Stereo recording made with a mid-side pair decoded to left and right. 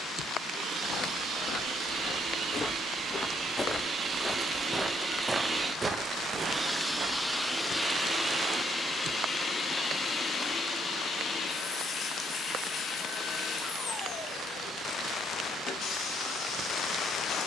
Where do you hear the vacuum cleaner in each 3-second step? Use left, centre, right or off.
right, right, centre, left, left, left.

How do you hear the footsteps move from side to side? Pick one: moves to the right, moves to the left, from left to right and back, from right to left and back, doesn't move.
moves to the right.